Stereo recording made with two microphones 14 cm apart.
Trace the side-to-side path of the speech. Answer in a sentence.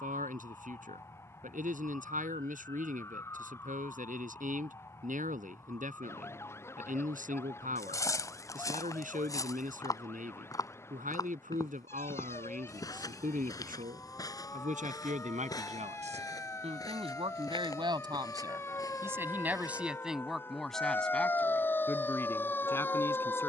In this clip you hear the speech go from the right side to the left.